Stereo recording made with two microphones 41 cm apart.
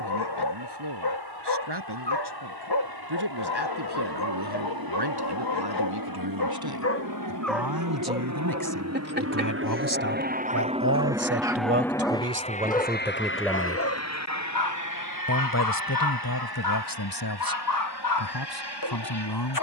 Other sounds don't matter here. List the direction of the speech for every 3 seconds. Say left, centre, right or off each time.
right, right, right, right, centre, left, left.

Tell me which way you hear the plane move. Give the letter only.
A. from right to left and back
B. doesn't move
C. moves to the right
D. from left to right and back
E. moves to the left
E.